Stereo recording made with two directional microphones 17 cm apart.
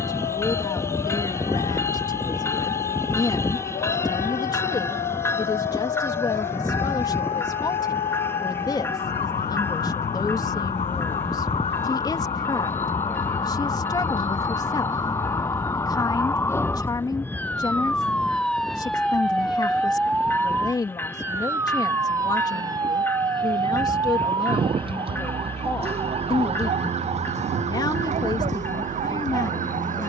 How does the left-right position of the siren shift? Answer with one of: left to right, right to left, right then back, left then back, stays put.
left to right.